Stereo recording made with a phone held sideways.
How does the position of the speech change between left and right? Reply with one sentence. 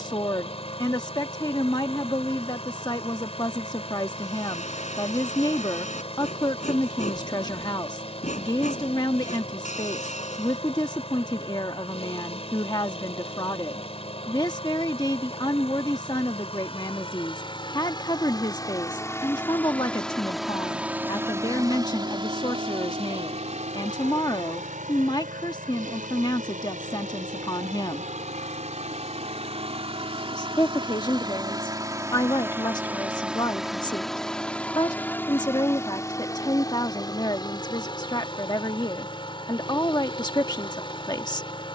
You can hear the speech stay in one place.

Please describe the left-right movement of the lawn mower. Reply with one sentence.
In this clip you hear the lawn mower move from left to right and back again.